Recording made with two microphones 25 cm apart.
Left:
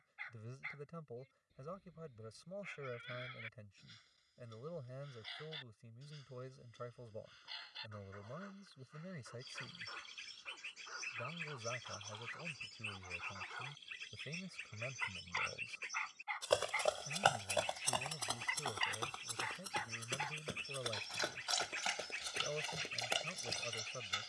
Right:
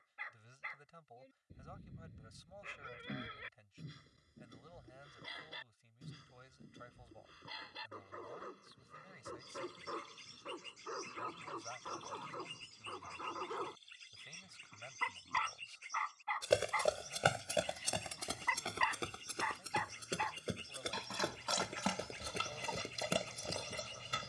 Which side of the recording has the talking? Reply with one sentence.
You can hear the talking on the left.